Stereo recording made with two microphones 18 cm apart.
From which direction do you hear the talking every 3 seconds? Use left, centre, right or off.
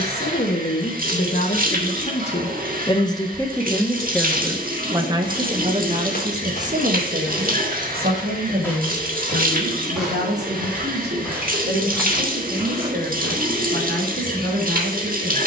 left, centre, right, right, right.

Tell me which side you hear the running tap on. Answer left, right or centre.
right.